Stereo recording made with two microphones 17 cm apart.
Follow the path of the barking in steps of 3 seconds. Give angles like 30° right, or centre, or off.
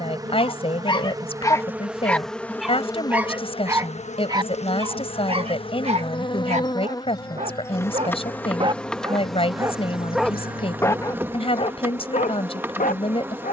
20° left, 20° right, 40° right, centre, 50° left.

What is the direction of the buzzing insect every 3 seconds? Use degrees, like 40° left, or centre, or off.
10° right, 30° left, 20° left, 10° right, 10° right.